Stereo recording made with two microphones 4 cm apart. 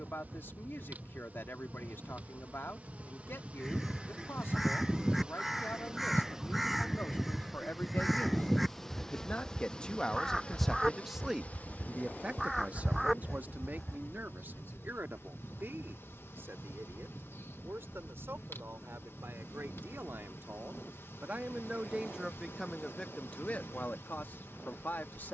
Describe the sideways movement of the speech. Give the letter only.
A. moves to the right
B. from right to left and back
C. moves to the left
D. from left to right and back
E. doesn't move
D.